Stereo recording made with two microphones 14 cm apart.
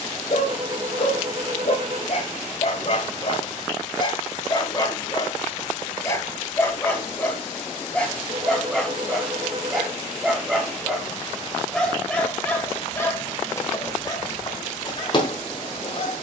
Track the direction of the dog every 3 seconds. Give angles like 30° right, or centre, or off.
50° left, 40° left, 10° left, centre, 20° left, 40° left.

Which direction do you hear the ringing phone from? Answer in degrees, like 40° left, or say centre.
50° right.